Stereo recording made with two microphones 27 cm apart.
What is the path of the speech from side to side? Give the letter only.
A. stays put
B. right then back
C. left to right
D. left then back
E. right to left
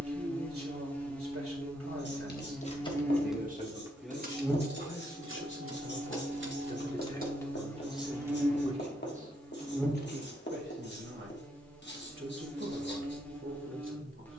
D.